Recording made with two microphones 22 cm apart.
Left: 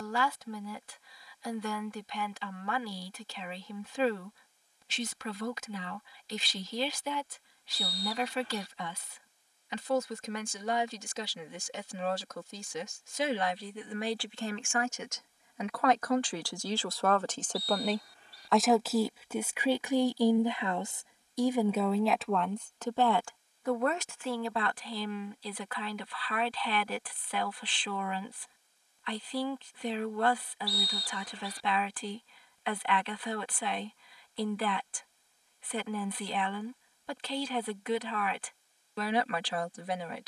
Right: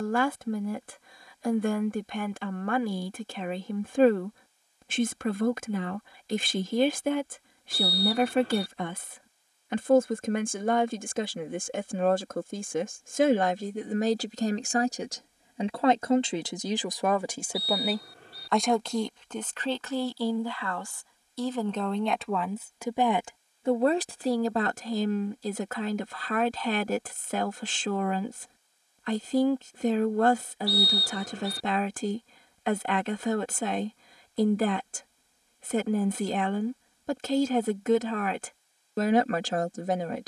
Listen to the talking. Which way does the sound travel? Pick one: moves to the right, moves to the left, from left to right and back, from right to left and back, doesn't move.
from right to left and back.